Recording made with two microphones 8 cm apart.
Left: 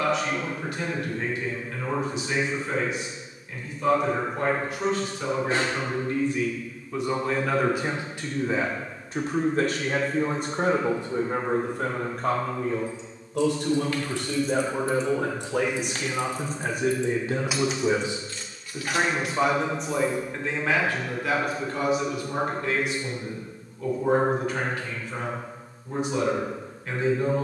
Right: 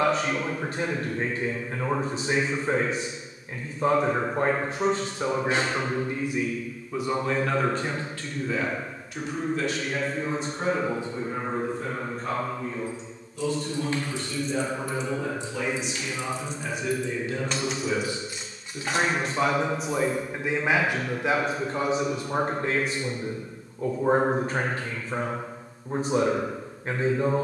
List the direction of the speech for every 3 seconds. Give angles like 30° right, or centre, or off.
40° right, 30° right, centre, 50° left, 70° left, 50° left, centre, 30° right, 40° right.